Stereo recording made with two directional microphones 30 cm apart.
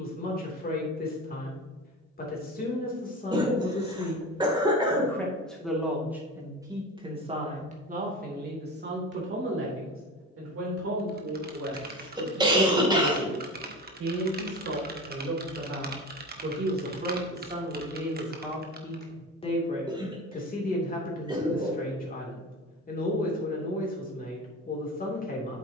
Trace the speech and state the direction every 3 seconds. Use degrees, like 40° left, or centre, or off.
30° left, 10° left, 20° right, 50° right, 60° right, 30° right, 20° left, 30° left, 30° left.